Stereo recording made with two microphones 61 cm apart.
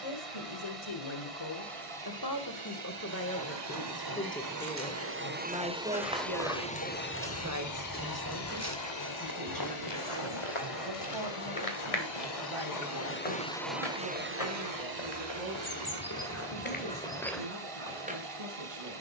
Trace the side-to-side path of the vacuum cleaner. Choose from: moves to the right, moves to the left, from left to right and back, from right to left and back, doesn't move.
from right to left and back.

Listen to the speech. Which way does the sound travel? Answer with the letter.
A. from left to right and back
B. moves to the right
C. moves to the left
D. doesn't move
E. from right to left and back
B.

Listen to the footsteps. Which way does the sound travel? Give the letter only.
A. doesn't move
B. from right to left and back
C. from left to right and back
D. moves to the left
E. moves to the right
B.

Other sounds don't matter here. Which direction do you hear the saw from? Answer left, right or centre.
left.